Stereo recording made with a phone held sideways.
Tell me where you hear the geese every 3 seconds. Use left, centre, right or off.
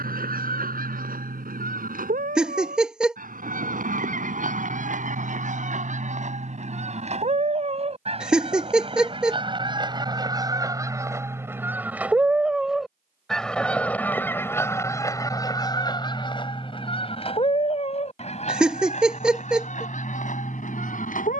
right, right, right, right, centre, left, left.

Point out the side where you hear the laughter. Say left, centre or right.
centre.